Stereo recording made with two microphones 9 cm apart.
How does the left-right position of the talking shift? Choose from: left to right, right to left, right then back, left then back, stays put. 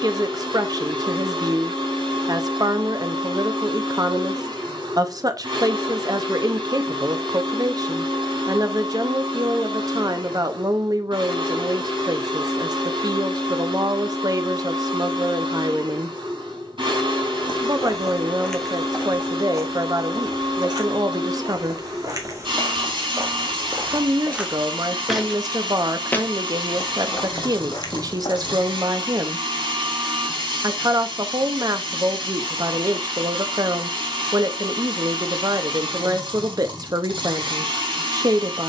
stays put.